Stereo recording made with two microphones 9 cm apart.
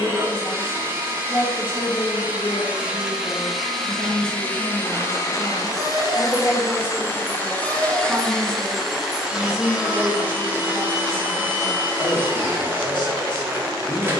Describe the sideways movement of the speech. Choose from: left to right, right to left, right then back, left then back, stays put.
right then back.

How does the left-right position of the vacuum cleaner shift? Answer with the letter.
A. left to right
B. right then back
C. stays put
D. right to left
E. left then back
E.